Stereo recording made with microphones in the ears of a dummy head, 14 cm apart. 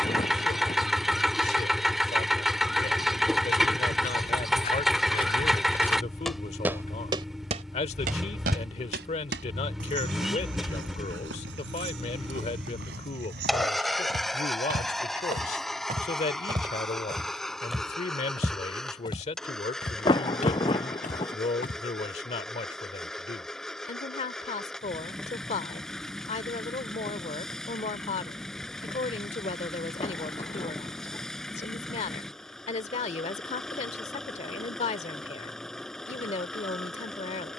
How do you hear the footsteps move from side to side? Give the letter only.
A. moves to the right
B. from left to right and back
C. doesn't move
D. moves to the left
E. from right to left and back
B.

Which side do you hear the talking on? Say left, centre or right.
left.